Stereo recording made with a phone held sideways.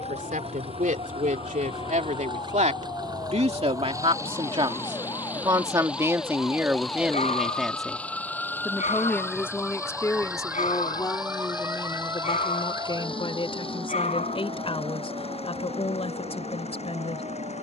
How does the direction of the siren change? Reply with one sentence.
You can hear the siren travel towards the right.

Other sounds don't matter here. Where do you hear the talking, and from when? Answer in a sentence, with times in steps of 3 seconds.
In this clip you hear the talking on the right from 0 s, in the centre from 6 s and on the left from 9 s.